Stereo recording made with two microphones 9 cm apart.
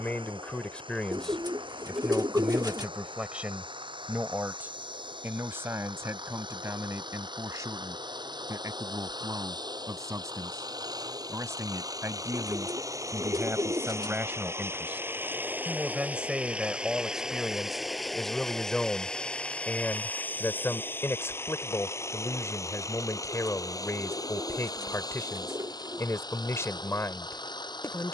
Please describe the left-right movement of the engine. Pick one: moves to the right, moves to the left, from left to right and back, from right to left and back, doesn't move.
moves to the left.